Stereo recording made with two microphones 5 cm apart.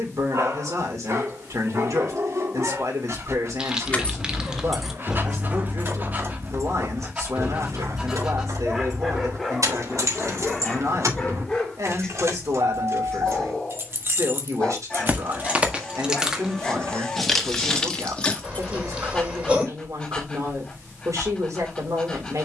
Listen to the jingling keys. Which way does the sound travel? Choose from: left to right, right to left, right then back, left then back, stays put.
right then back.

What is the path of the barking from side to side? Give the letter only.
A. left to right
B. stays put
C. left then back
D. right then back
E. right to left
E.